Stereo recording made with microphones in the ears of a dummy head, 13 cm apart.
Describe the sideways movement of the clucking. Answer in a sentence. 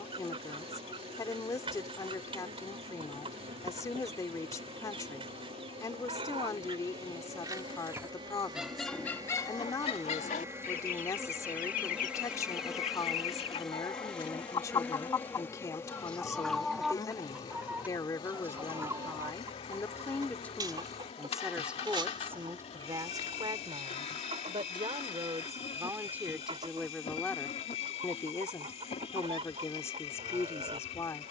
You can hear the clucking move from right to left and back again.